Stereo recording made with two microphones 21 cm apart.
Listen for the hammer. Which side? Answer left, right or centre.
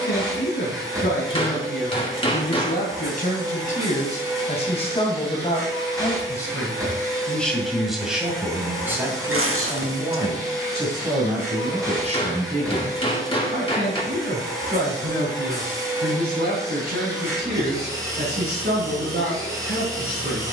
left.